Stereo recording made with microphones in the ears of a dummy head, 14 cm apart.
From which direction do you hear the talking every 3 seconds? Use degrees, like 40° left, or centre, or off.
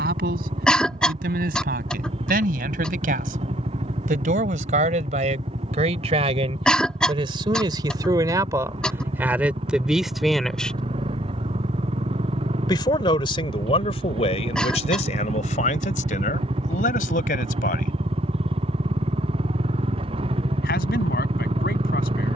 60° right, 50° right, 30° right, centre, 40° left, 50° left, 70° left, 70° left.